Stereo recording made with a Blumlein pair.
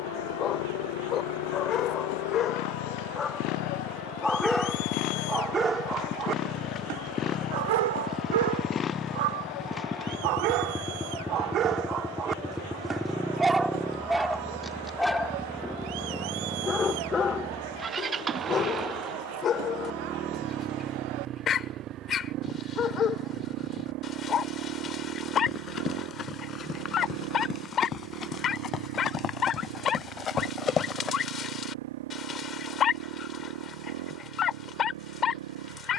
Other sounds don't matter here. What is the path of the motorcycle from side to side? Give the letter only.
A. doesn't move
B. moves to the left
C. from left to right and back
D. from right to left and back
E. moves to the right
E.